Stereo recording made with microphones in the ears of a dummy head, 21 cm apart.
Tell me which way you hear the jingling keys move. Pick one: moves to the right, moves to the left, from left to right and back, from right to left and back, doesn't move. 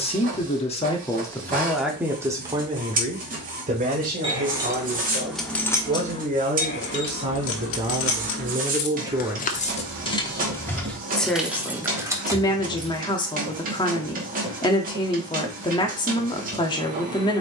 from right to left and back.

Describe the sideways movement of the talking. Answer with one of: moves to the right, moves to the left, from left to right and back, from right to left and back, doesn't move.
from left to right and back.